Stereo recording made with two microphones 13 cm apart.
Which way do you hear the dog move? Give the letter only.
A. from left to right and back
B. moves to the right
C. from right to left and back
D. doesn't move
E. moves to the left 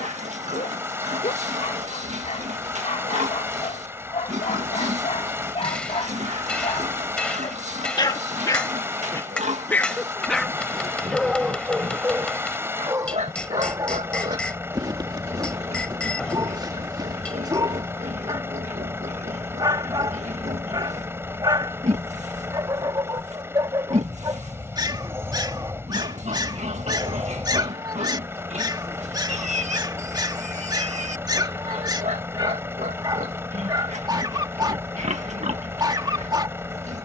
B.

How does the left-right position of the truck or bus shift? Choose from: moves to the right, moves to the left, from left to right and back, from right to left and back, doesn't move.
doesn't move.